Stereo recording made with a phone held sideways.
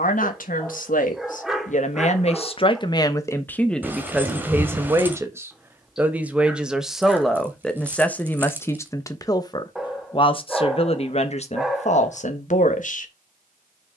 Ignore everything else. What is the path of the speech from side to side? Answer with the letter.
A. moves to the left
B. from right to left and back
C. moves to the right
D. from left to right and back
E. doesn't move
D.